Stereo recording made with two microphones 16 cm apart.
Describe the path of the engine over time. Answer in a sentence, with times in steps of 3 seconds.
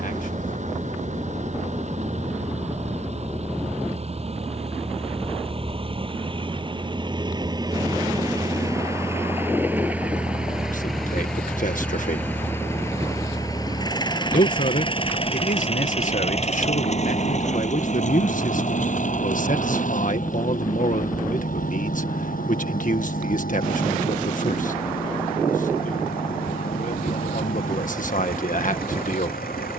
In this clip you hear the engine on the right from 0 s, in the centre from 9 s and on the left from 12 s.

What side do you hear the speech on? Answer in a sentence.
You can hear the speech on the left.